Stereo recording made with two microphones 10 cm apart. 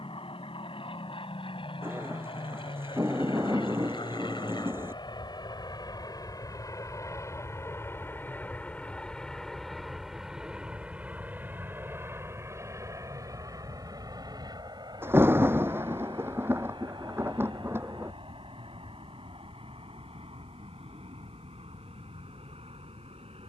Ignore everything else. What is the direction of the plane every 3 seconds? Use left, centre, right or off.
left, left, left, centre, right, right, right, right.